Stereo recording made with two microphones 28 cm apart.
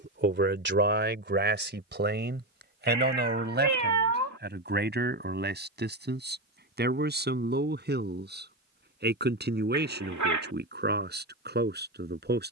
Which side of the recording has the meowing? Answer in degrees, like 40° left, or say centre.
80° right.